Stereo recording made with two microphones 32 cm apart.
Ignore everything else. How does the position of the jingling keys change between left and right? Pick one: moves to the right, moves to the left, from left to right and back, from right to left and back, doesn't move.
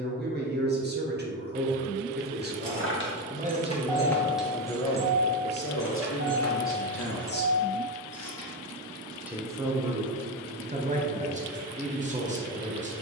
moves to the right.